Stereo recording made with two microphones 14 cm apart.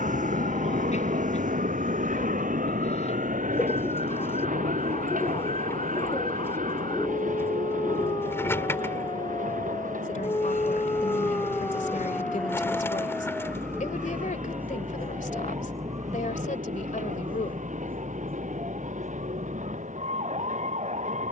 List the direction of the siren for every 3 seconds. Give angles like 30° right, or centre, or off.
60° left, 50° left, 40° left, 20° left, centre, 30° right, 50° right.